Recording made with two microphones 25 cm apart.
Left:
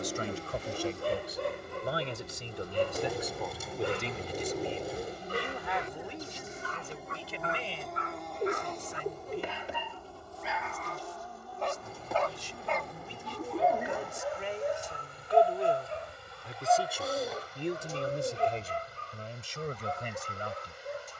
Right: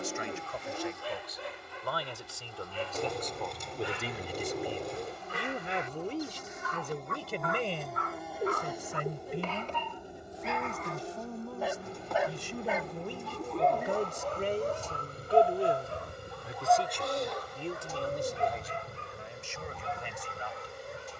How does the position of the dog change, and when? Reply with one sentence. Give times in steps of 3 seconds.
You can hear the dog on the left from 0 s, in the centre from 9 s and on the left from 15 s.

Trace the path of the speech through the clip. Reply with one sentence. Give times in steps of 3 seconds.
You can hear the speech on the left from 0 s, in the centre from 3 s, on the right from 6 s, in the centre from 15 s and on the left from 18 s.